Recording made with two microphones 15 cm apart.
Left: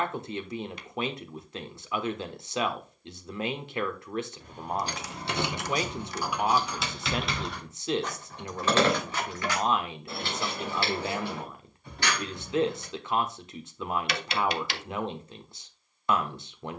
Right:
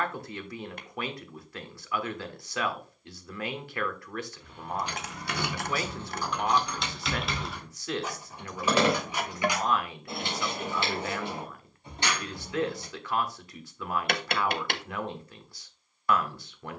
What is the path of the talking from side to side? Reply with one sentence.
You can hear the talking stay in one place.